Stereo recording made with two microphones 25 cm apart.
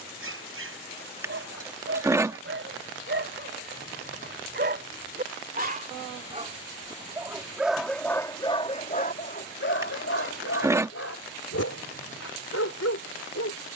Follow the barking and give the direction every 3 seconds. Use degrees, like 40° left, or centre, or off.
50° right, 40° right, centre, 60° left, 80° left.